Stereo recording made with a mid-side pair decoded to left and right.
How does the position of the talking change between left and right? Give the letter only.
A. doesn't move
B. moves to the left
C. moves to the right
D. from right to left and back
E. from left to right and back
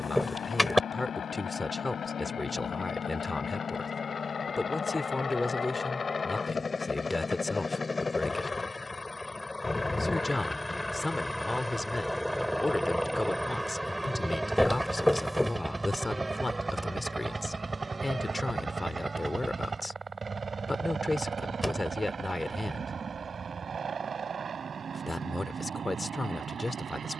A.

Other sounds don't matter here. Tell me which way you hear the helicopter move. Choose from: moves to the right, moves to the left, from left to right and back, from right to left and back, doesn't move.
moves to the right.